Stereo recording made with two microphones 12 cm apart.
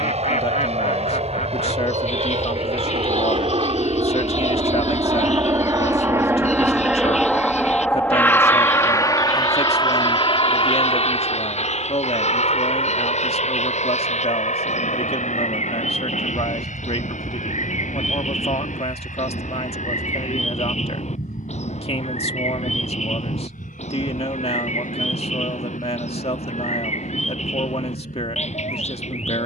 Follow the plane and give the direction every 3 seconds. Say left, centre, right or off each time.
right, right, centre, left, left, left, left, left, left, left.